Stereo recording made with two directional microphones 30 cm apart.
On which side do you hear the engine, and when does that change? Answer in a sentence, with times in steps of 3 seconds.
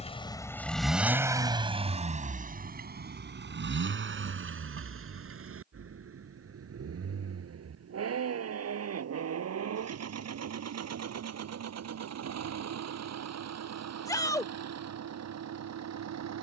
In this clip you hear the engine in the centre from 0 s and on the right from 3 s.